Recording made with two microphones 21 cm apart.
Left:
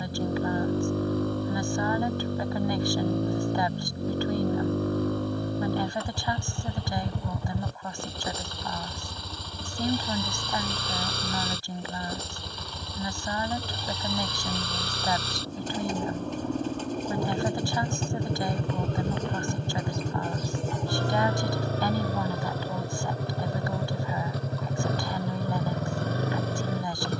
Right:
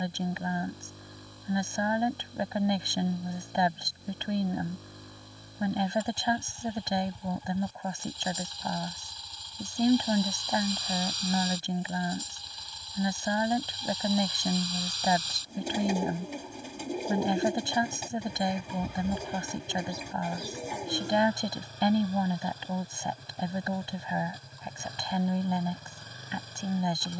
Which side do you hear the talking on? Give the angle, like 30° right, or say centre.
20° right.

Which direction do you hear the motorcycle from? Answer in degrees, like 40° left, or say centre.
70° left.